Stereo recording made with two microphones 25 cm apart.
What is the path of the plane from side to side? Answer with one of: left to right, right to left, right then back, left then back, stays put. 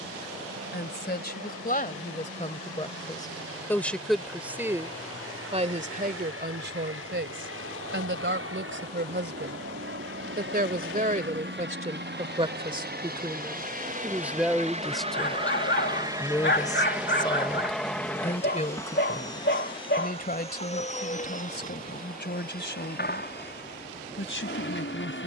right to left.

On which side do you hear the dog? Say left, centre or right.
left.